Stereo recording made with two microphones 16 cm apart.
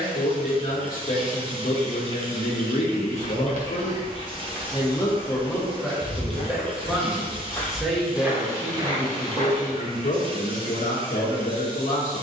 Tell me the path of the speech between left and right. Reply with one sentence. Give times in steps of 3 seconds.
In this clip you hear the speech on the left from 0 s, in the centre from 6 s and on the left from 9 s.